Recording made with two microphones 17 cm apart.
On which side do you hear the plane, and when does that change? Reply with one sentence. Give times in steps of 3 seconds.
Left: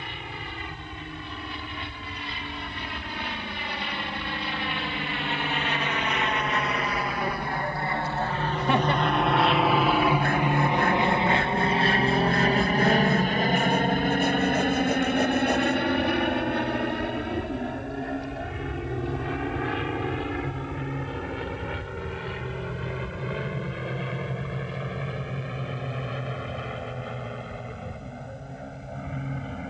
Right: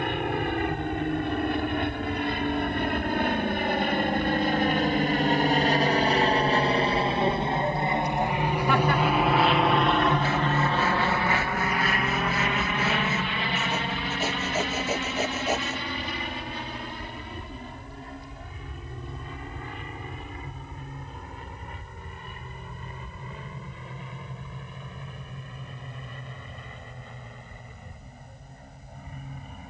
You can hear the plane on the right from 0 s, in the centre from 9 s and on the left from 12 s.